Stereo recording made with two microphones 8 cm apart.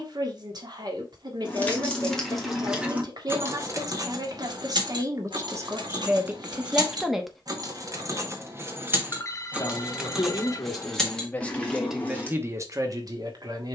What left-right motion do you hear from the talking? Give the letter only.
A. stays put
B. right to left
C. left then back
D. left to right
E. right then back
C.